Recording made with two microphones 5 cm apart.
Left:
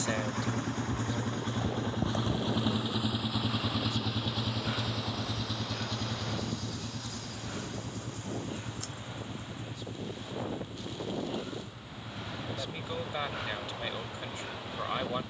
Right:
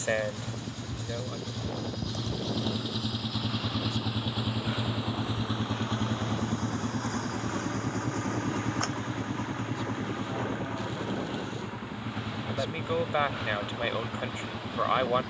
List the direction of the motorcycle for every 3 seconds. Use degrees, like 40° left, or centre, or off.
40° left, 10° right, 40° right, 60° right, 70° right.